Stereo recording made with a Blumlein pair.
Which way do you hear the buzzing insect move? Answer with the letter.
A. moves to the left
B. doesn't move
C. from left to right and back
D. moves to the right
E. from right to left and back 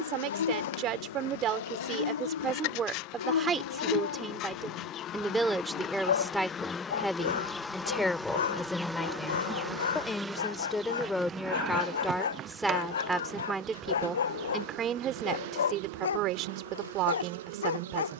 D.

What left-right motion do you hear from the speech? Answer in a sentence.
You can hear the speech go left and come back.